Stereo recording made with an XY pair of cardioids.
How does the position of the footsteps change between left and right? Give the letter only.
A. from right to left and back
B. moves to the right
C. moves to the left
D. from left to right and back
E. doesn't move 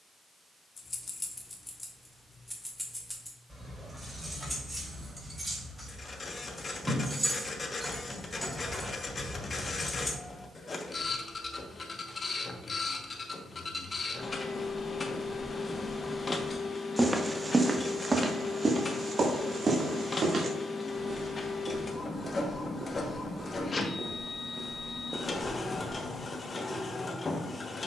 D.